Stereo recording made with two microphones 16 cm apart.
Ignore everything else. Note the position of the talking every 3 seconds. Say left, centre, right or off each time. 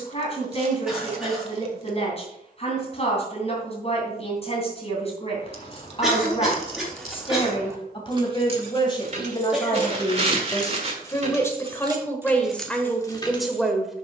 left, left, left, left, centre.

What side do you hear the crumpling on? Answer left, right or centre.
right.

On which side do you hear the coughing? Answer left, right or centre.
centre.